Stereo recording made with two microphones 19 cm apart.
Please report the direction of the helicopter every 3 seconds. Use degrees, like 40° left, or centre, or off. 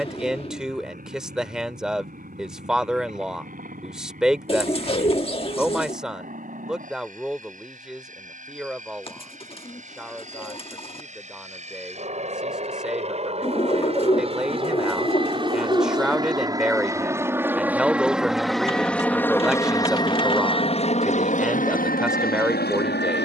50° right, 50° right, 50° right, 40° right, 40° right, 20° right, 10° left, 50° left.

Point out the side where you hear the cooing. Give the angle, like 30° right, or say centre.
30° left.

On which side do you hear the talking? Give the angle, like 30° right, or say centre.
centre.